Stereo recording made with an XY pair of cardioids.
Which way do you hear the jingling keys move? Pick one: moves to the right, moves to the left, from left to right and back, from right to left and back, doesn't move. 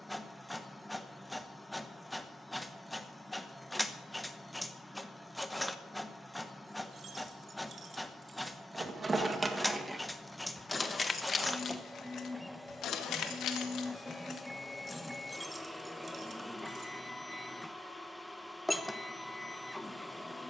from right to left and back.